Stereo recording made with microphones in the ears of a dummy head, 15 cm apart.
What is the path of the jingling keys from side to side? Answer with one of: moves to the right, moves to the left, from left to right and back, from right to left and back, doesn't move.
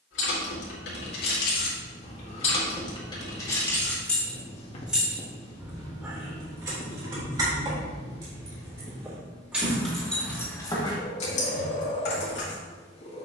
from left to right and back.